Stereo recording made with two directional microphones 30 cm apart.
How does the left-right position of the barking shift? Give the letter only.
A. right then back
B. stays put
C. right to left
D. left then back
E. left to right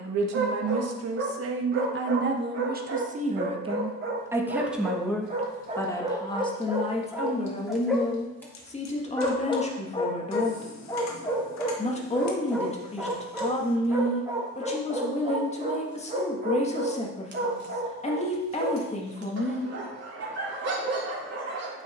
D.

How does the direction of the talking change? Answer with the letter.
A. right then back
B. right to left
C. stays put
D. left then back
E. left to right
B.